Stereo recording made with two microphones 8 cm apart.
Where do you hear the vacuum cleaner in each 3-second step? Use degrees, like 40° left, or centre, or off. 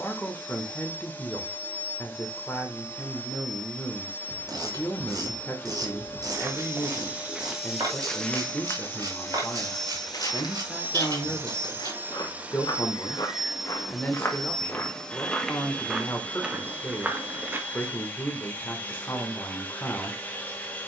20° left, 20° left, 20° left, 10° right, 10° right, 20° left, 20° left.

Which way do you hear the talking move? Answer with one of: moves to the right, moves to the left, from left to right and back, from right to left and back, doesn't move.
doesn't move.